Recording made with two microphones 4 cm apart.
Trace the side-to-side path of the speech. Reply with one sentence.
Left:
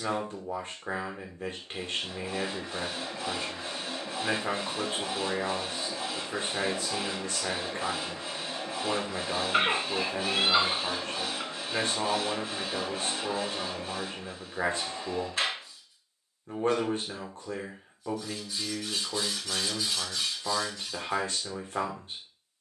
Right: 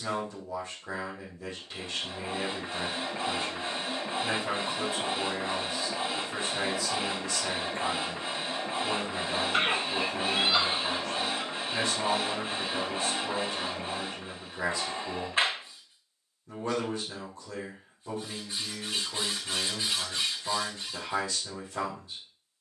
You can hear the speech stay put.